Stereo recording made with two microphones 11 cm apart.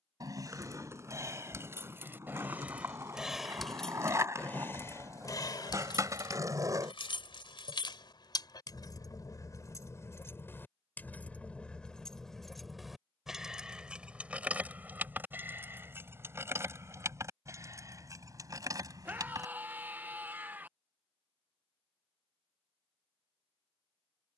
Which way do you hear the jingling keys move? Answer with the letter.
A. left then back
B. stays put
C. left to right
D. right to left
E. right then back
A.